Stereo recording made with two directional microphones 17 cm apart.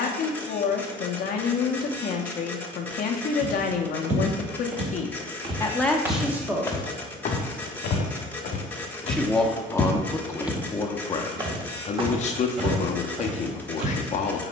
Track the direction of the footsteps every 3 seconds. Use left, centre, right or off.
off, right, left, centre, right.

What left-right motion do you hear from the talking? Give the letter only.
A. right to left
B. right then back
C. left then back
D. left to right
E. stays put
B.